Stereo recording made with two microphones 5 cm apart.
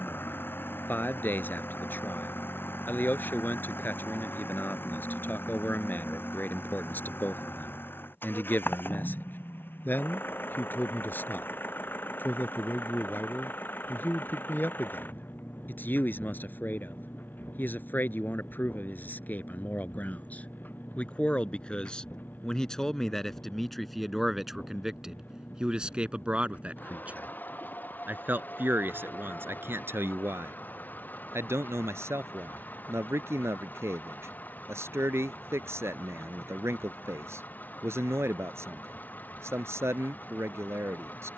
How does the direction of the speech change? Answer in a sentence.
You can hear the speech move from left to right.